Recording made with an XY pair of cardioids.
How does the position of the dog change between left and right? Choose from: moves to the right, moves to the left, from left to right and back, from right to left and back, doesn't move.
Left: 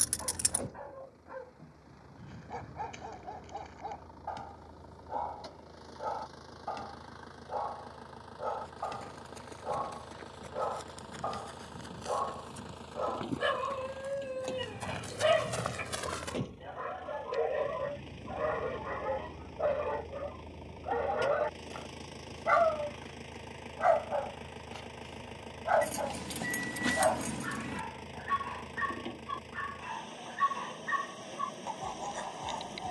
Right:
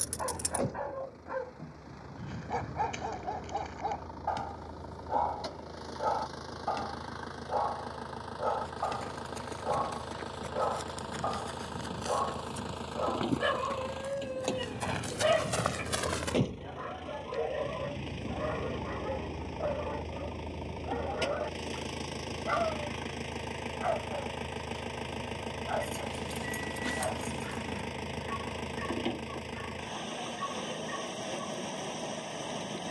moves to the left.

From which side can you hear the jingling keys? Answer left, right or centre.
left.